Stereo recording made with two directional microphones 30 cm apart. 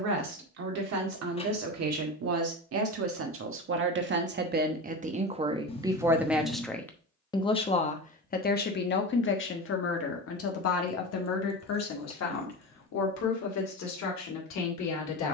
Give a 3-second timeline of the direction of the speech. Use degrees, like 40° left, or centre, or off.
60° right, 30° right, 20° left, 50° left, 60° left.